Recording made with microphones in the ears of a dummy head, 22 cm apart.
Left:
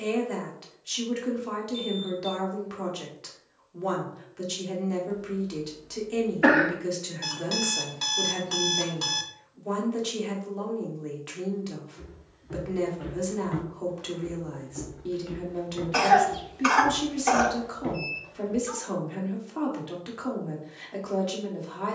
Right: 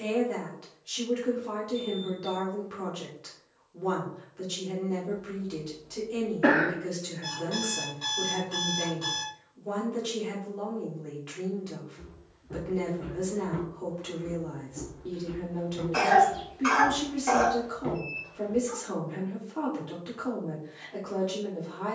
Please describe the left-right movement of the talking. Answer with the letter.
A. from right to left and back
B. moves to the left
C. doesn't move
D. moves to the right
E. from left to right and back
C.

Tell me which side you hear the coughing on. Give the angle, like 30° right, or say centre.
30° left.